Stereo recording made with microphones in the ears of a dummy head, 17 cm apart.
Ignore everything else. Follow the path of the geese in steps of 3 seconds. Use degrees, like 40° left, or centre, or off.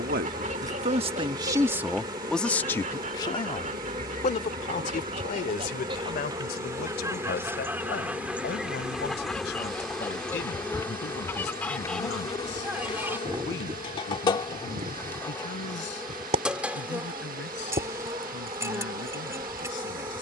40° right, 40° right, 10° right, 10° left, 20° right, 30° right, 30° right.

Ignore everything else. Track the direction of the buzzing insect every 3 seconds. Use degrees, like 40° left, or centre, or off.
20° right, 20° right, 10° right, 10° left, 20° left, centre, 20° right.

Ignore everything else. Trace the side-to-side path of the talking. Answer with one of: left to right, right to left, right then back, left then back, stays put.
right to left.